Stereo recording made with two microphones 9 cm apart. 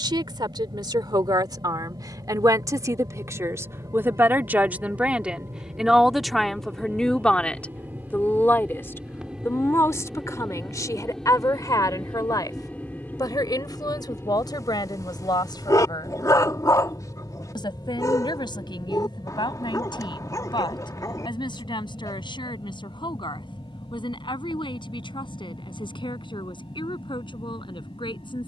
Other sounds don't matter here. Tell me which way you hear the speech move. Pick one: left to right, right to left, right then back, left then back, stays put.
right to left.